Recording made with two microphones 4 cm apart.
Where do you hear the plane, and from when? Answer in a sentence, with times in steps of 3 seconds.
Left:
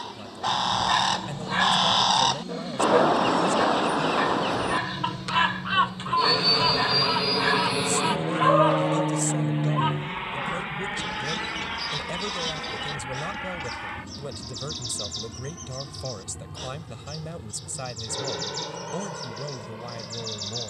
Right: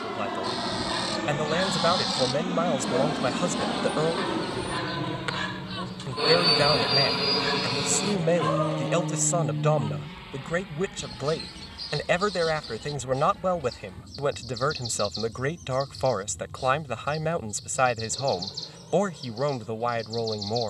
You can hear the plane on the right from 0 s, in the centre from 6 s and on the left from 9 s.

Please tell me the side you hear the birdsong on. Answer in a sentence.
You can hear the birdsong on the left.